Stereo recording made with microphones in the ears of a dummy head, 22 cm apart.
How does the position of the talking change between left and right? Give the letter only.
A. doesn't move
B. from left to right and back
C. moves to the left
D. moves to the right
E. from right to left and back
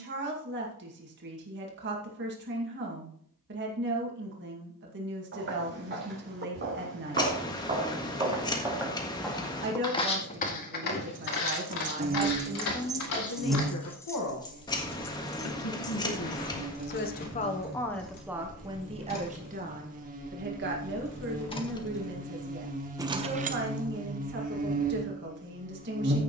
E.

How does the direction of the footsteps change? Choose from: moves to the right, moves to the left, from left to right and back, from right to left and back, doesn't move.
moves to the left.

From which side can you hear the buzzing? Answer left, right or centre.
right.